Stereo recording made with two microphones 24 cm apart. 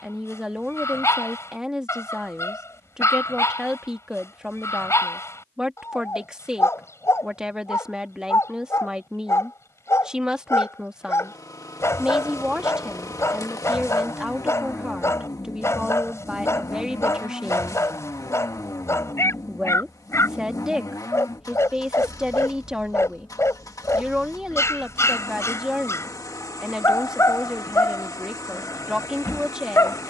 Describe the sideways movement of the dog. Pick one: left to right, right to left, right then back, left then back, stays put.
stays put.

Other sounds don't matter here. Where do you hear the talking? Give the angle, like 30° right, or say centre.
centre.